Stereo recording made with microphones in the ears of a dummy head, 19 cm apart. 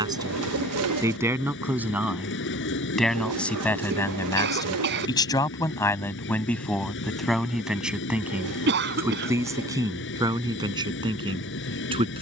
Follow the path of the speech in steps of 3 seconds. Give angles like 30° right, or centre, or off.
10° right, 10° left, centre, 20° right.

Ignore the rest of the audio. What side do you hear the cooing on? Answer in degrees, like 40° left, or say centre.
70° right.